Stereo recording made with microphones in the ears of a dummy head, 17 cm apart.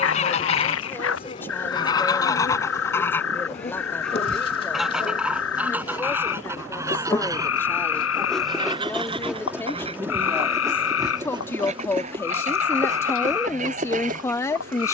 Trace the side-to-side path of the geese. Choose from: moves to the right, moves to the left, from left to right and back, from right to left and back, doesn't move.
moves to the right.